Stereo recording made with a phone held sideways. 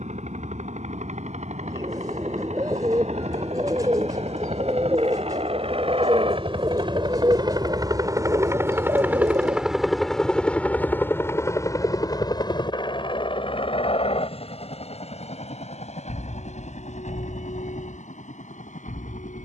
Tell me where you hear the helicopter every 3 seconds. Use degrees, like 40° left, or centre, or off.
70° right, 60° right, 30° right, 10° left, 40° left, 50° left, 60° left.